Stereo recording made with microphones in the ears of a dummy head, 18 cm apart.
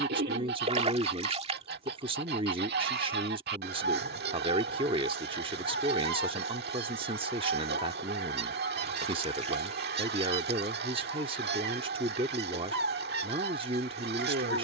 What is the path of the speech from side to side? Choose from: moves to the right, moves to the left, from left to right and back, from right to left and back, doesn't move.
doesn't move.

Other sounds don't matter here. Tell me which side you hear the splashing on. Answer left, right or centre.
right.